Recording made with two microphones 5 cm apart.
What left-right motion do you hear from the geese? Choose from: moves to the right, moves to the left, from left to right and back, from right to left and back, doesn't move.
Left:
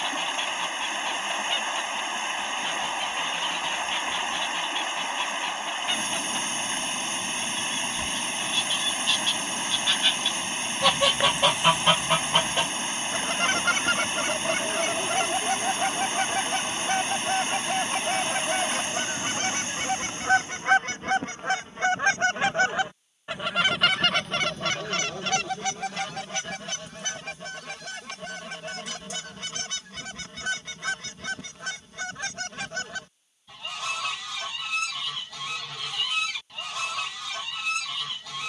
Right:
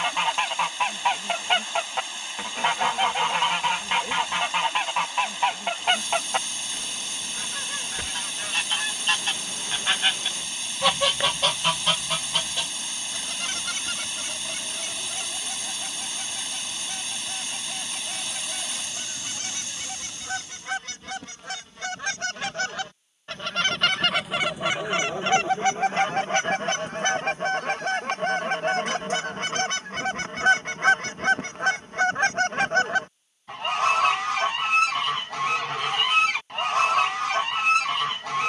from right to left and back.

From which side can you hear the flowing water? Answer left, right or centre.
left.